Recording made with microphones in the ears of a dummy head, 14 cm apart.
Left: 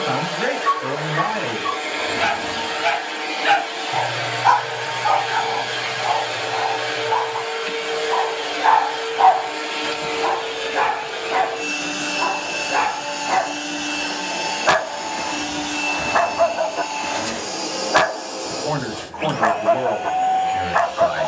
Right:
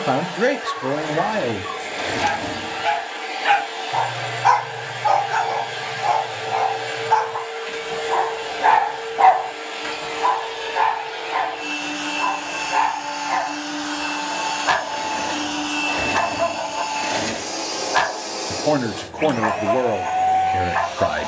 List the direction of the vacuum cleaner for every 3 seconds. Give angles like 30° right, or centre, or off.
70° left, 70° left, 70° left, 60° left, 30° left, centre, 10° right.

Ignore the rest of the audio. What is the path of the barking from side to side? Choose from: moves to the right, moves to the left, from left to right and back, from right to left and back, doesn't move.
from left to right and back.